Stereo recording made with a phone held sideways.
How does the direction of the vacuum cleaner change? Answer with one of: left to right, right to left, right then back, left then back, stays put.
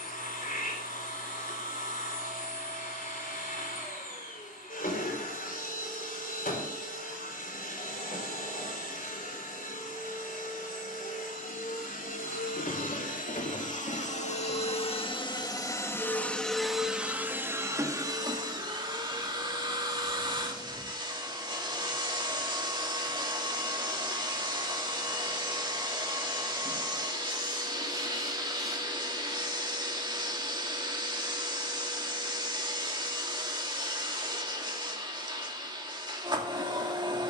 left to right.